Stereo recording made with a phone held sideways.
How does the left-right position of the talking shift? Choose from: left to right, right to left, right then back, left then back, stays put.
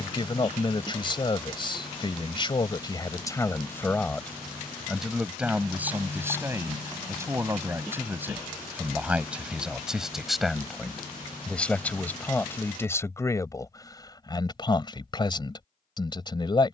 right then back.